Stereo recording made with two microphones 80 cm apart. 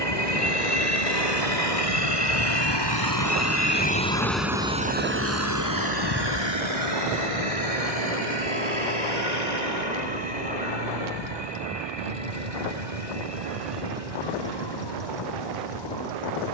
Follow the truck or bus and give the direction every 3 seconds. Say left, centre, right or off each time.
left, centre, right, right, right, right.